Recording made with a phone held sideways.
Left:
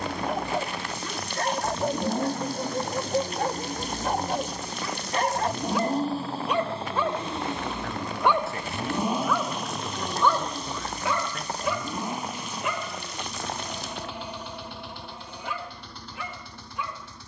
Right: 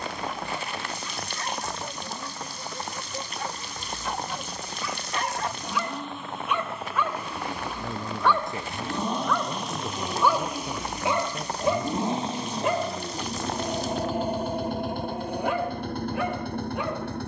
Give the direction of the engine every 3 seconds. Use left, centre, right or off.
left, left, left, centre, right, right.